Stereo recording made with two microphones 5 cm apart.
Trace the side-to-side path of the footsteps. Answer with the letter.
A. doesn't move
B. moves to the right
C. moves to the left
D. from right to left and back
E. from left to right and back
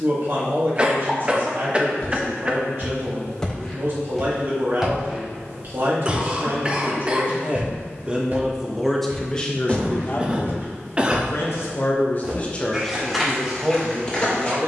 E.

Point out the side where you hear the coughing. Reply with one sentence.
In this clip you hear the coughing on the right.